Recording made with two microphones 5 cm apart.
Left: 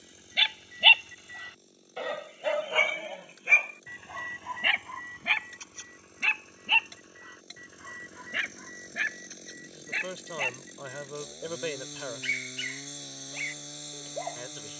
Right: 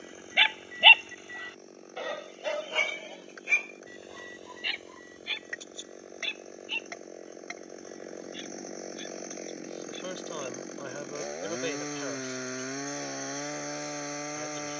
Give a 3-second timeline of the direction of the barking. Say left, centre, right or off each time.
centre, left, left, left, left.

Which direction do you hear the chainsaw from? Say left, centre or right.
right.